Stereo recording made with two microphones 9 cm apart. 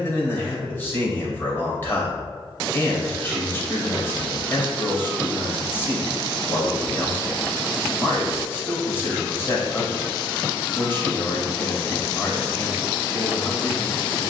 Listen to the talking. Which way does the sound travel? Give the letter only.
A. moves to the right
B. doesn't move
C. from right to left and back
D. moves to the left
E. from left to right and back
B.